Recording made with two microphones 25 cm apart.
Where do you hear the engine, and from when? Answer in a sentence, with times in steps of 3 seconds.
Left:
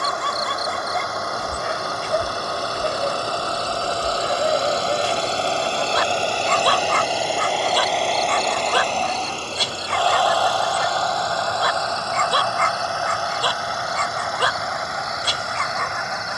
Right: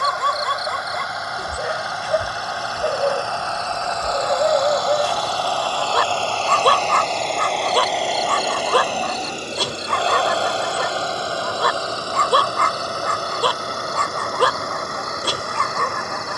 You can hear the engine on the left from 0 s, in the centre from 6 s and on the right from 9 s.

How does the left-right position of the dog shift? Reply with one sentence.
You can hear the dog stay in one place.